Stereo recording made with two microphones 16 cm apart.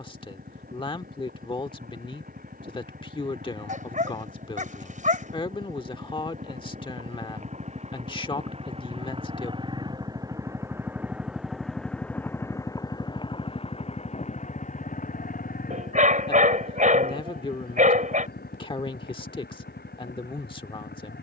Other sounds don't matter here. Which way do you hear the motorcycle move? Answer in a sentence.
You can hear the motorcycle travel towards the left.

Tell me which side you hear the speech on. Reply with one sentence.
In this clip you hear the speech on the left.